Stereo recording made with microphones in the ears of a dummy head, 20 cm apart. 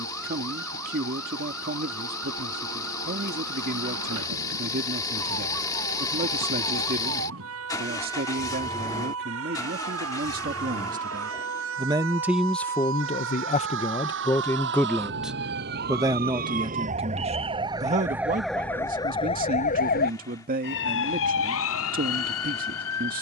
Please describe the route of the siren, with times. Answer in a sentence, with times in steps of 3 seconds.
In this clip you hear the siren on the right from 0 s and on the left from 18 s.